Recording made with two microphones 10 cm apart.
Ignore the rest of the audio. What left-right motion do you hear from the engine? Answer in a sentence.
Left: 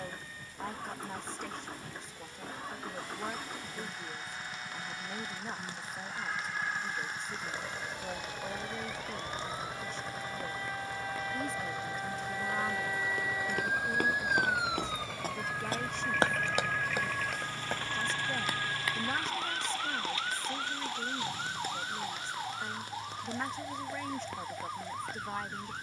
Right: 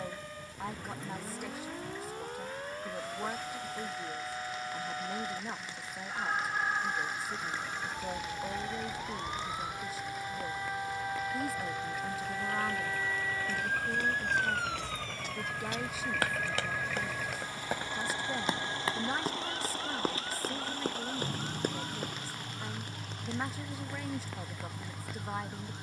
You can hear the engine travel towards the right.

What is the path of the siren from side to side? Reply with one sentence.
In this clip you hear the siren go from the right side to the left.